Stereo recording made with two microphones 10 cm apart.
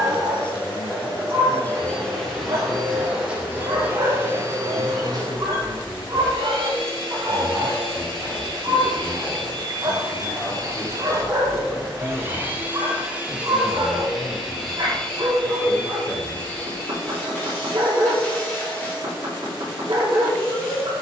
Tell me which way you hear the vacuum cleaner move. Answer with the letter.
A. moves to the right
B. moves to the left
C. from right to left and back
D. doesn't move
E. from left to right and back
E.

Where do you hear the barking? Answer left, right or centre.
right.